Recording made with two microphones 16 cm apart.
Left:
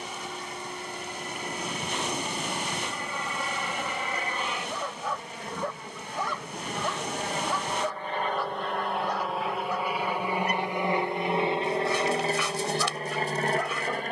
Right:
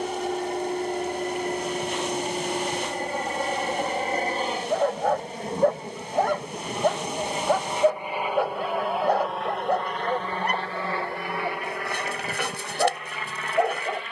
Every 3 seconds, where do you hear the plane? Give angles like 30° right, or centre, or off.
50° right, 40° right, 20° right, 10° left, 30° left.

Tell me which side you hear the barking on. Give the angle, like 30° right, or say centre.
60° right.